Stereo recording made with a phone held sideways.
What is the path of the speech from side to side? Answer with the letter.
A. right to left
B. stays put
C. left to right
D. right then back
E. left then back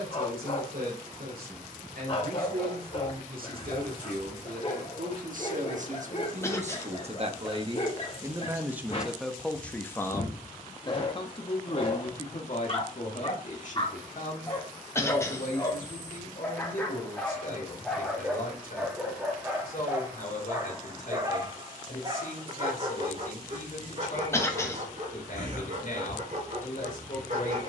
A.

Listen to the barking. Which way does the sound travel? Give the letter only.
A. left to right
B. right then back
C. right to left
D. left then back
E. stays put
A.